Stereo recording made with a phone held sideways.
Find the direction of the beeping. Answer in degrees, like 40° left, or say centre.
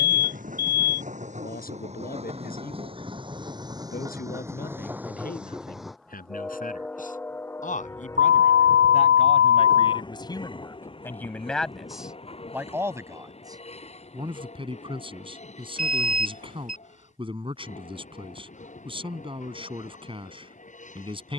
60° right.